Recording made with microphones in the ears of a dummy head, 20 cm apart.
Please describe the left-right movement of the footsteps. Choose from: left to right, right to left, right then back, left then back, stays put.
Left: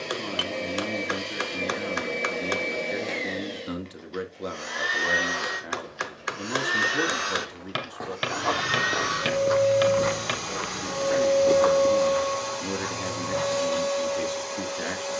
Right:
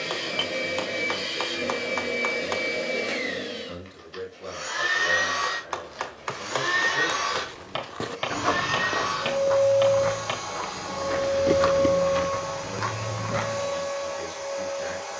left then back.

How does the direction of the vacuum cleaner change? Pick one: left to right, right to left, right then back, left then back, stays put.
right to left.